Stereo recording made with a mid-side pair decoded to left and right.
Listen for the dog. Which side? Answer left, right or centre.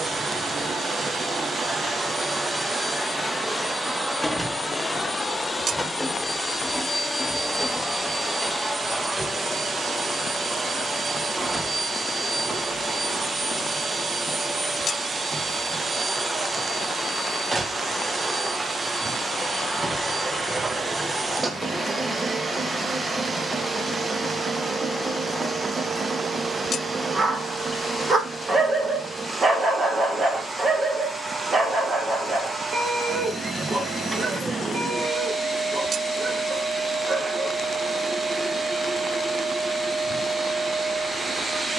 right.